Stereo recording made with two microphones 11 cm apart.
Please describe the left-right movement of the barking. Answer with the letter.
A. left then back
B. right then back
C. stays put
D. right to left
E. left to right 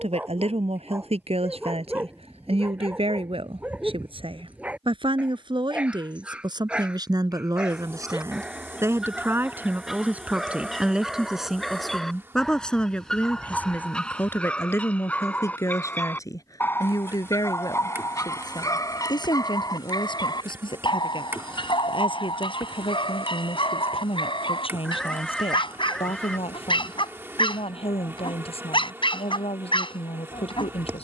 D.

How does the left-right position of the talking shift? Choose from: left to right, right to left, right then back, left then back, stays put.
right to left.